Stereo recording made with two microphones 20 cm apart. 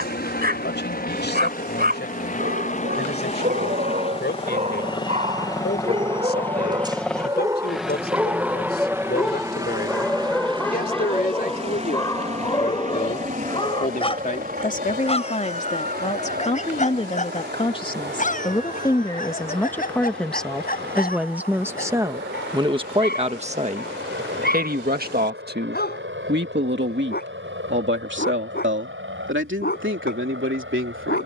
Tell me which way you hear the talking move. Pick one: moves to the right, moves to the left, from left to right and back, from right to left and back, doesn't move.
moves to the right.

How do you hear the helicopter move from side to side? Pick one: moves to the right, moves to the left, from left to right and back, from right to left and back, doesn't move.
moves to the right.